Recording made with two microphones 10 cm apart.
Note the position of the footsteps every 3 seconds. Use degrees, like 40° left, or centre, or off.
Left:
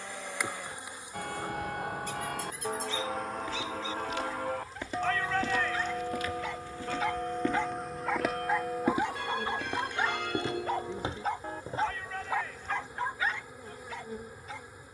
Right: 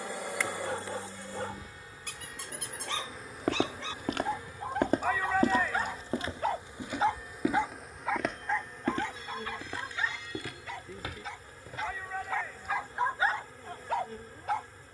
off, 50° right, 10° right, 30° left, off.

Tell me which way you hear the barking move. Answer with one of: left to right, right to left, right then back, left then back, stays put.
left then back.